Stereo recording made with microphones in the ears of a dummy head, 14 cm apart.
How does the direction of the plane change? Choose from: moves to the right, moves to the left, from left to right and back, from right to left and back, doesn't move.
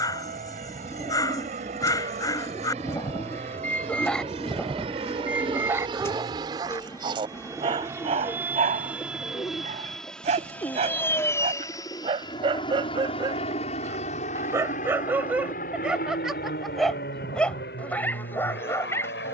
moves to the left.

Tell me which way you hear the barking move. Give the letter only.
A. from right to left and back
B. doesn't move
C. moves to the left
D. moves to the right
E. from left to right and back
E.